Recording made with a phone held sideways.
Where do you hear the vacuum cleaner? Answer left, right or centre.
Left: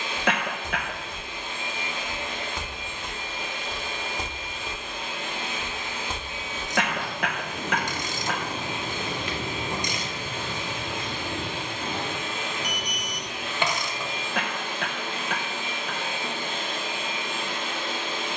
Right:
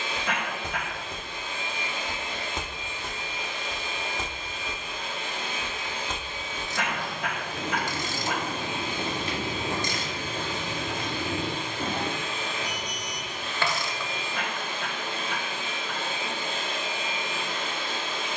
left.